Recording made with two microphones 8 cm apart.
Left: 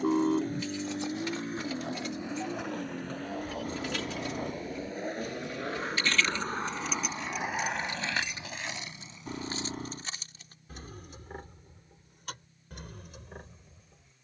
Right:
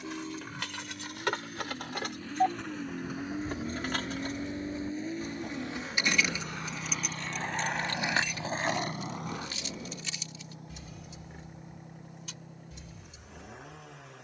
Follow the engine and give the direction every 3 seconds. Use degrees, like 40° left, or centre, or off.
30° left, 30° right, 60° right, 70° right, 70° right.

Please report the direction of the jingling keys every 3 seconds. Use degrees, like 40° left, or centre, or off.
70° right, 40° right, 10° left, 40° left, 60° left.